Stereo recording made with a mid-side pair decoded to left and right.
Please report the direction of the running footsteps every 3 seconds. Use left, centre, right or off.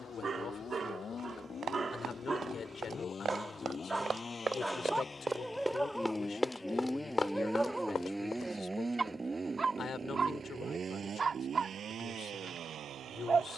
right, right, left, off, off.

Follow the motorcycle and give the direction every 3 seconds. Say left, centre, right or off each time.
left, left, centre, right, right.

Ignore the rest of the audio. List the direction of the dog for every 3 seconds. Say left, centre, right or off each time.
right, centre, centre, right, right.